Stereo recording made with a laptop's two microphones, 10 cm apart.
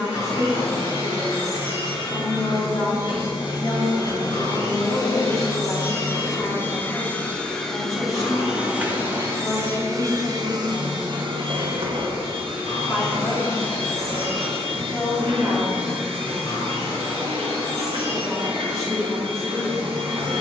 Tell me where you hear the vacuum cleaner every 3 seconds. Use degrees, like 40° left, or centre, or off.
50° left, 40° left, 10° left, 40° right, 60° right, 60° right, 60° right.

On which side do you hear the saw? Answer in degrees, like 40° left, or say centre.
70° left.